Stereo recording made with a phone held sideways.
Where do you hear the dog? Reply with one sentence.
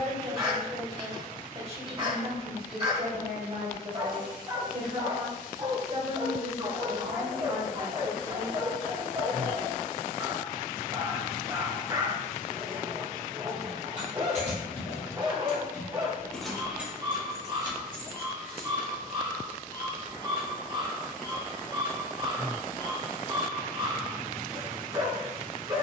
You can hear the dog on the right.